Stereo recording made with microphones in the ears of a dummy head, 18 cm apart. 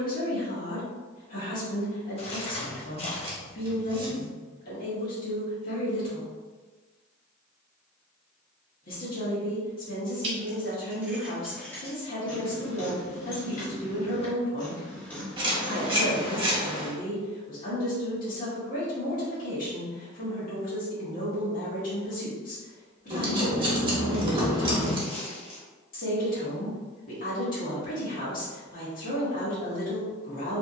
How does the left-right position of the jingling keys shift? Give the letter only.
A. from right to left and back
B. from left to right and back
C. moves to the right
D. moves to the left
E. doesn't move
A.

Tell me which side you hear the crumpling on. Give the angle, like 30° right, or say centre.
30° left.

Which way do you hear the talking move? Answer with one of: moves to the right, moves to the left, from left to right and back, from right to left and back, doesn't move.
doesn't move.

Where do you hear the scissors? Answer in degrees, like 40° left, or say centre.
30° right.